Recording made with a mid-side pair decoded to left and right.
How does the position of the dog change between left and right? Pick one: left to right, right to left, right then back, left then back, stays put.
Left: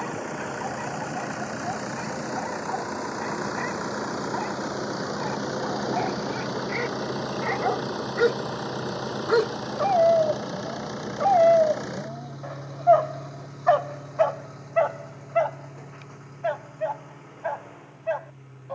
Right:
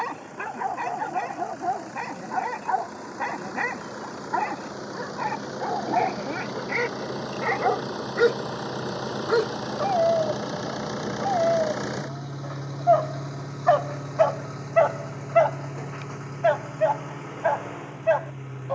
left then back.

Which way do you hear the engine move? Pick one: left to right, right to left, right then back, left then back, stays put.
left to right.